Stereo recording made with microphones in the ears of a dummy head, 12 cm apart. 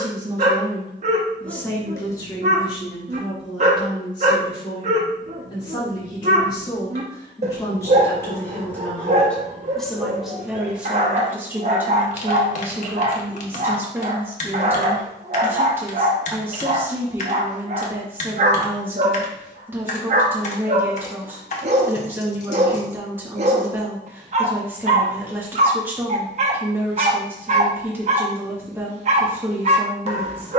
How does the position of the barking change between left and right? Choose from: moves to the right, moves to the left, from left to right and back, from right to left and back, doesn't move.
doesn't move.